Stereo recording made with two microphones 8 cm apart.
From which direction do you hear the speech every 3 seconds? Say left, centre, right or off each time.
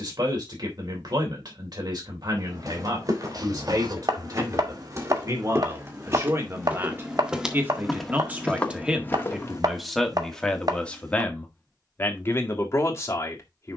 right, right, right, centre, left.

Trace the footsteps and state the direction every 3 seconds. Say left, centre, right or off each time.
right, right, centre, left, off.